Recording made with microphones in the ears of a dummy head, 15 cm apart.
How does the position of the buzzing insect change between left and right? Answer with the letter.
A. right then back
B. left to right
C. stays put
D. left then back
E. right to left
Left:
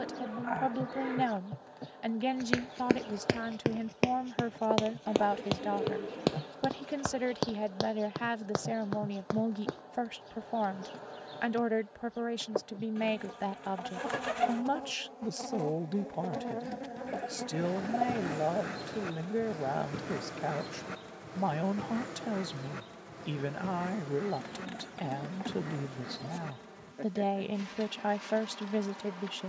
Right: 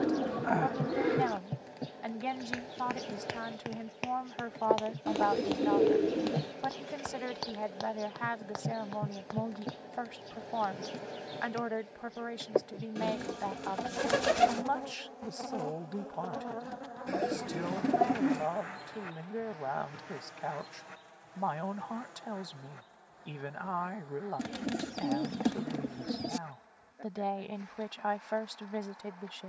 E.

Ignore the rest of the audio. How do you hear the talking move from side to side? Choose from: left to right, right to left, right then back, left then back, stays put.
stays put.